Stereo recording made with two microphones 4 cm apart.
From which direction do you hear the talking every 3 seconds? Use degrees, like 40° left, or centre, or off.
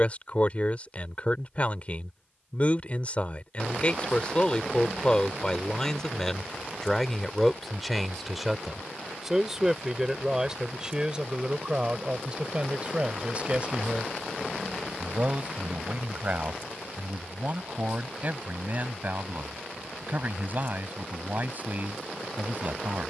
30° left, 20° left, centre, 20° right, 30° right, 40° right, 40° right, 40° right.